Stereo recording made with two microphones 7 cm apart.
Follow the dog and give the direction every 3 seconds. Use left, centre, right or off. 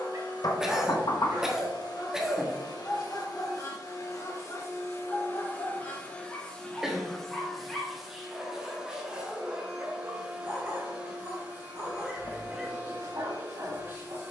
right, left, centre, right, right.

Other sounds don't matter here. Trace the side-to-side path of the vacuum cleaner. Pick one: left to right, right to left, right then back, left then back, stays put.
left to right.